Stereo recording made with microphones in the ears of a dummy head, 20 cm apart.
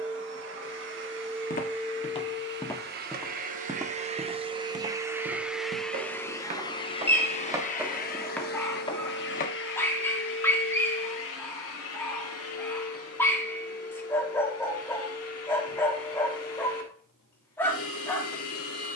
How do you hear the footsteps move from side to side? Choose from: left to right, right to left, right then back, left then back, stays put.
right then back.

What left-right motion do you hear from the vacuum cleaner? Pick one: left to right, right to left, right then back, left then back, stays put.
right to left.